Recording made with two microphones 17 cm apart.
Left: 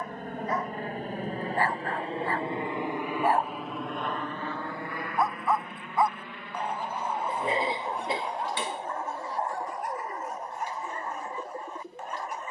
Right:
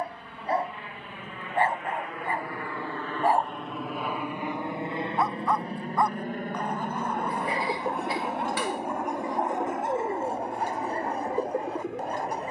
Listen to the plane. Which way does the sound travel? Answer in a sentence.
You can hear the plane go from the left side to the right.